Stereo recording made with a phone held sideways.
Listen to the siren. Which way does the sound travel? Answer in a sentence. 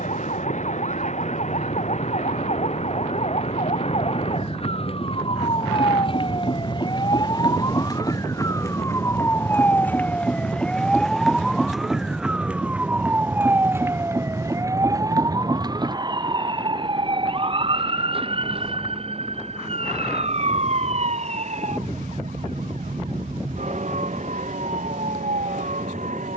In this clip you hear the siren move from left to right.